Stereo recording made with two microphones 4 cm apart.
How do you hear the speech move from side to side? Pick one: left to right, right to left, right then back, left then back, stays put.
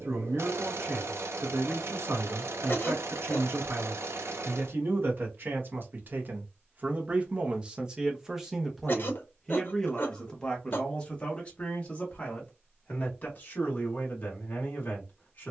right to left.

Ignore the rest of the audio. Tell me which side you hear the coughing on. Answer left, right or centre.
left.